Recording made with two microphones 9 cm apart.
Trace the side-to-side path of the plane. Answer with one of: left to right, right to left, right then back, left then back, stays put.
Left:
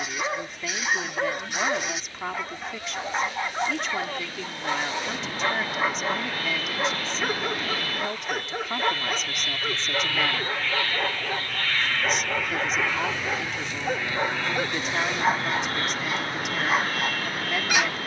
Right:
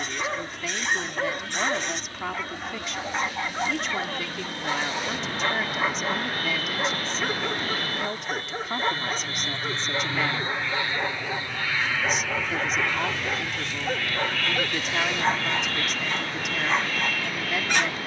right to left.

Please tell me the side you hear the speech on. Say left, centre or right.
centre.